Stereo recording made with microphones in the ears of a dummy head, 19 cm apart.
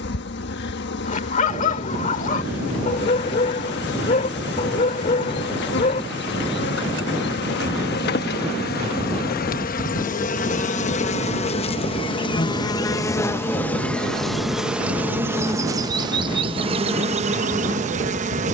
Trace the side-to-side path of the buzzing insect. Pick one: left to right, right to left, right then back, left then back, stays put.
left to right.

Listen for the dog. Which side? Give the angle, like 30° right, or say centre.
40° left.